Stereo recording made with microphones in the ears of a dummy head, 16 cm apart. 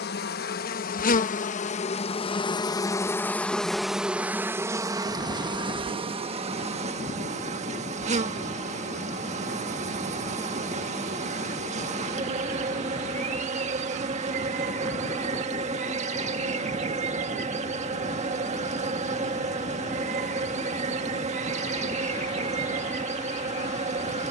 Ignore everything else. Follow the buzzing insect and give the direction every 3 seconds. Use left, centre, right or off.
left, centre, right, right, right, right, right, right.